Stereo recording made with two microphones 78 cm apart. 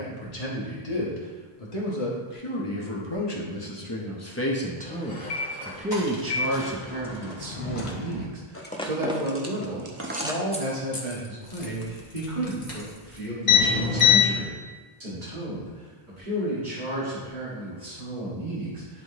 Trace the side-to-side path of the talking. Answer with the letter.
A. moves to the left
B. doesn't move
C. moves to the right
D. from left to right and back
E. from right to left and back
C.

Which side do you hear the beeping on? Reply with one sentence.
You can hear the beeping on the left.